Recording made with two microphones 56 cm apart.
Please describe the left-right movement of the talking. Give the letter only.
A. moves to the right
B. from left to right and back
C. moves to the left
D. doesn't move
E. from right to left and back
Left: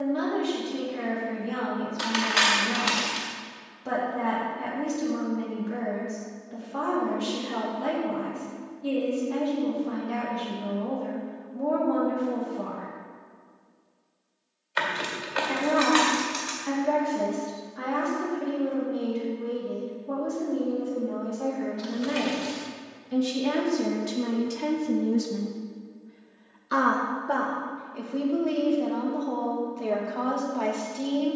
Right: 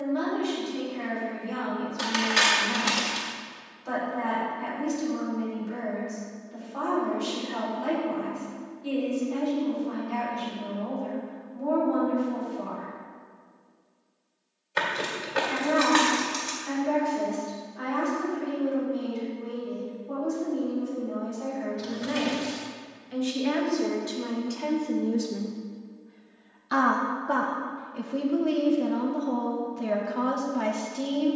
A.